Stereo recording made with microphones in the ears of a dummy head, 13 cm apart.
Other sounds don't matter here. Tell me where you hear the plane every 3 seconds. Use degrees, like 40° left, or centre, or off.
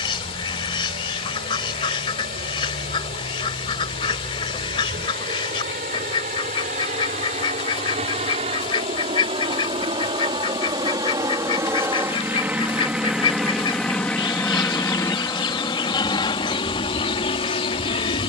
60° right, 60° right, 50° right, 30° right, centre, 30° left.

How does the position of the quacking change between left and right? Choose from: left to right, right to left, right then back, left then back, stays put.
stays put.